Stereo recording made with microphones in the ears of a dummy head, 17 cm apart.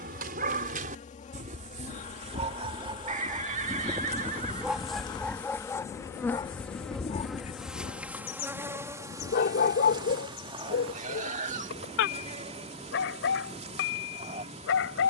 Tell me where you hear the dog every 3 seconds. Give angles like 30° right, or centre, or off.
40° right, 10° right, 30° left, 60° left, 70° left.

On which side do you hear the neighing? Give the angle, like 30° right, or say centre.
40° right.